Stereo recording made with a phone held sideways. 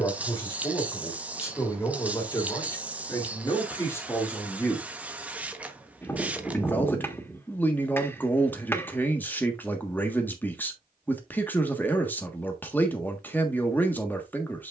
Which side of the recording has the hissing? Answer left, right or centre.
centre.